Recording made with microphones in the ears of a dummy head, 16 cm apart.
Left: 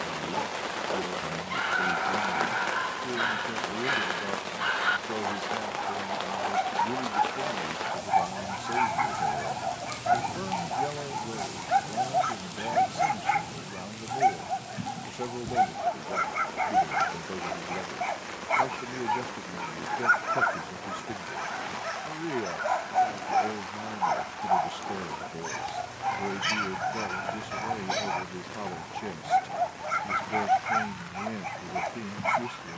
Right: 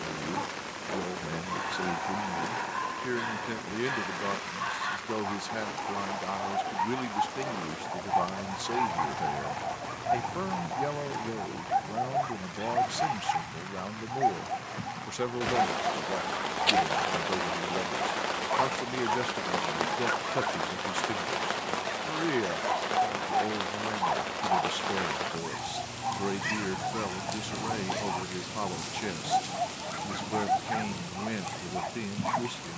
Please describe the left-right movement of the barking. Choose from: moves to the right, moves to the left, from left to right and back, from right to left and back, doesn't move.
doesn't move.